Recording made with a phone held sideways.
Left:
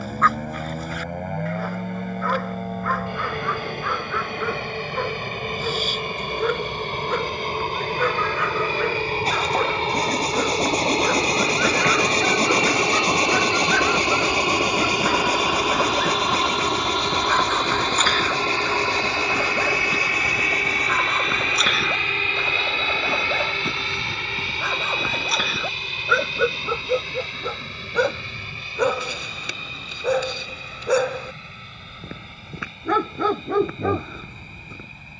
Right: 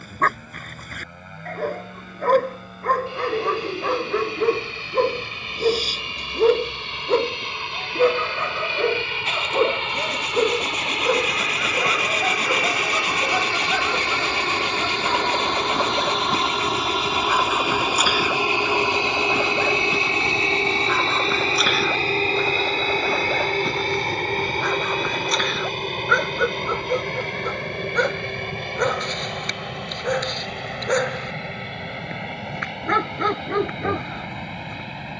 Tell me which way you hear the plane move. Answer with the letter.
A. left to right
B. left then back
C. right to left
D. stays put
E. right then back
A.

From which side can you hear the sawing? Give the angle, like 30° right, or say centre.
40° left.